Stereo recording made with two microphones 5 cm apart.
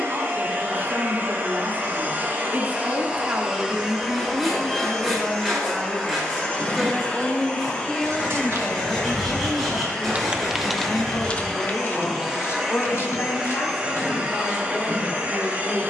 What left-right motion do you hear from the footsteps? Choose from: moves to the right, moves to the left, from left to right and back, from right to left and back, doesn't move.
moves to the left.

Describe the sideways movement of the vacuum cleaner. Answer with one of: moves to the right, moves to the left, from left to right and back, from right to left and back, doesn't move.
from right to left and back.